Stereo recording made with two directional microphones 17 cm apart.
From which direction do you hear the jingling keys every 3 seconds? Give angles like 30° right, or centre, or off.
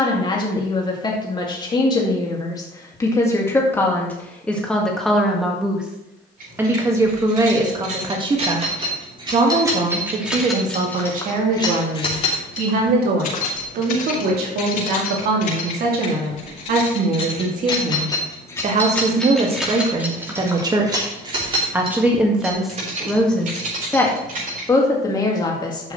off, off, 50° right, centre, 50° left, 40° left, centre, 40° right, 50° right.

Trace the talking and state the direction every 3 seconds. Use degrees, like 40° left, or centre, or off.
20° left, 10° left, 20° right, 50° right, 60° right, 60° right, 30° right, centre, 20° left.